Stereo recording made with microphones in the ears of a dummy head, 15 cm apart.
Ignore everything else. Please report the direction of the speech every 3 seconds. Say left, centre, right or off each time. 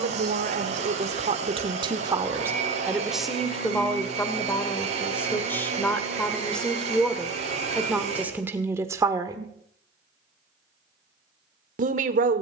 right, centre, centre, right.